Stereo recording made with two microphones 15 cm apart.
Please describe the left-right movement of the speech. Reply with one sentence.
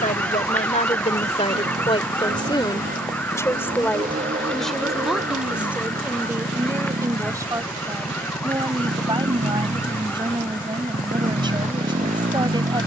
You can hear the speech travel towards the right.